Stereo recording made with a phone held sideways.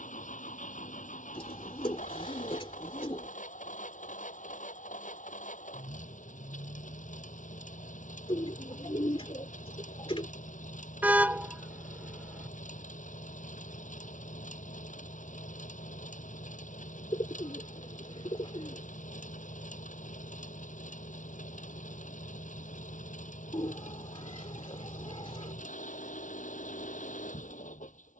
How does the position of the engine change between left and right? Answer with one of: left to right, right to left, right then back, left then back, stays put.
stays put.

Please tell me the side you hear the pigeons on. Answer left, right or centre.
left.